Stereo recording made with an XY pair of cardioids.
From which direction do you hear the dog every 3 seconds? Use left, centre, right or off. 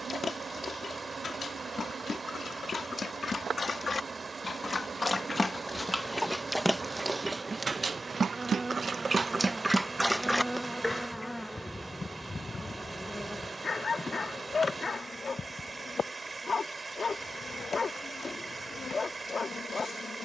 left, left, right, centre, left, left, left.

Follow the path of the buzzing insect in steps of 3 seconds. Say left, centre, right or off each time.
right, right, right, centre, left, left, left.